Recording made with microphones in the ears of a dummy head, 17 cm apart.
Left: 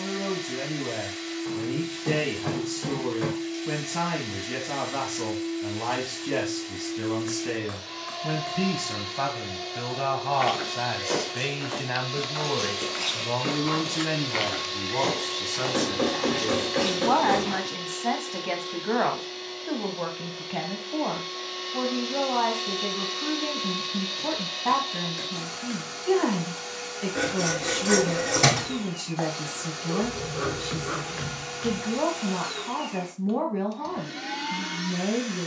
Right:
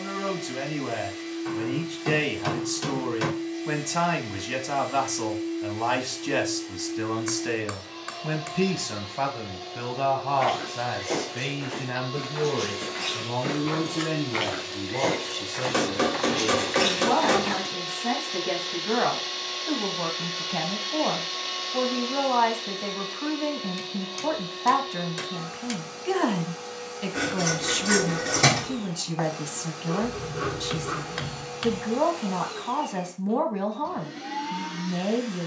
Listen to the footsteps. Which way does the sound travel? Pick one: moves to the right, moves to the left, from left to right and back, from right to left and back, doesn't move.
moves to the right.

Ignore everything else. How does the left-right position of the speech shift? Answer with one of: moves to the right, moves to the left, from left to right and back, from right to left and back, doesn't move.
from right to left and back.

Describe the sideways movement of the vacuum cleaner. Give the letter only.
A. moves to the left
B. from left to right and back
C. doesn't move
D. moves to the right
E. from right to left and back
B.